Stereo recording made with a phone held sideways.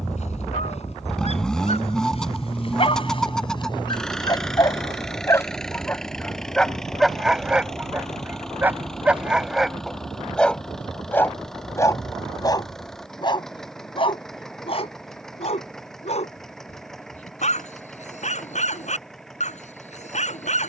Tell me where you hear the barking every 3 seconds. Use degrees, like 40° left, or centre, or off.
50° left, 30° left, centre, centre, 40° left, 50° left, 60° left.